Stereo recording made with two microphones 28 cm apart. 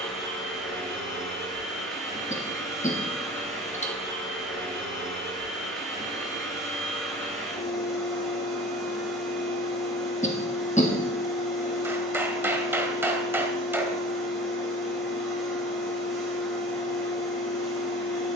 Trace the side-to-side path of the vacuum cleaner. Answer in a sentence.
You can hear the vacuum cleaner stay put.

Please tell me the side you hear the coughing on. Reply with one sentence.
In this clip you hear the coughing on the left.